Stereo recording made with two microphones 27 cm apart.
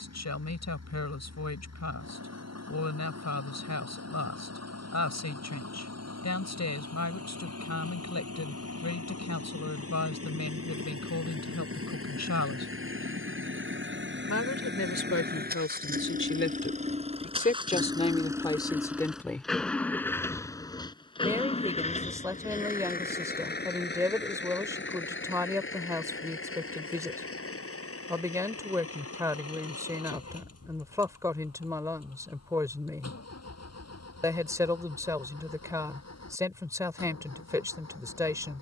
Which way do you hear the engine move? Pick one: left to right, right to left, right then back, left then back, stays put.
right to left.